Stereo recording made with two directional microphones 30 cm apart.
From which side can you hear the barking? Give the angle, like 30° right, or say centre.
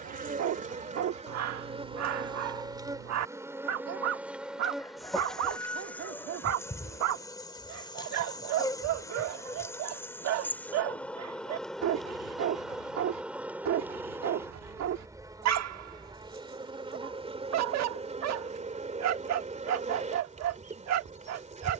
70° right.